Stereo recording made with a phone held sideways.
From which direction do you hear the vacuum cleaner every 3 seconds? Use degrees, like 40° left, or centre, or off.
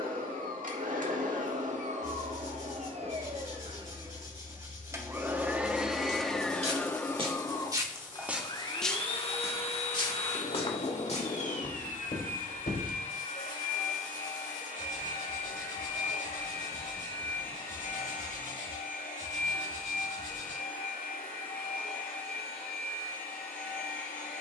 50° right, 20° right, 20° left, 50° left, 60° left, 70° left, 70° left, 70° left.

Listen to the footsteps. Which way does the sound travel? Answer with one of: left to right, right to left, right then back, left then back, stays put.
right to left.